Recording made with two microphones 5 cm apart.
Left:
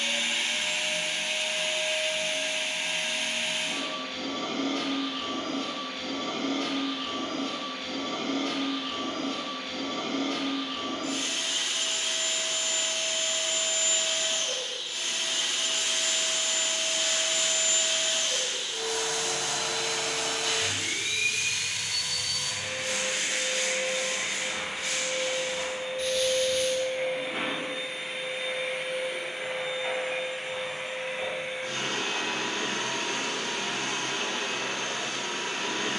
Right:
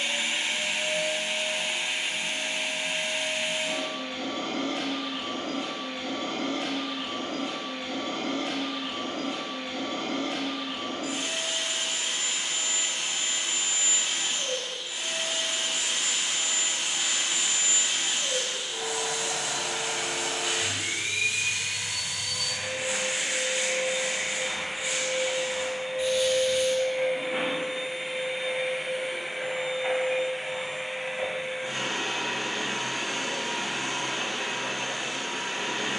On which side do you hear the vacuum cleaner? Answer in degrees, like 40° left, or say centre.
20° right.